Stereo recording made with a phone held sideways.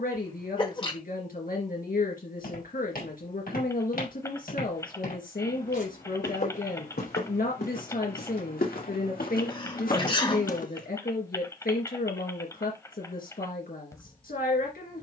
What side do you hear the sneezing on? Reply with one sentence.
You can hear the sneezing on the left.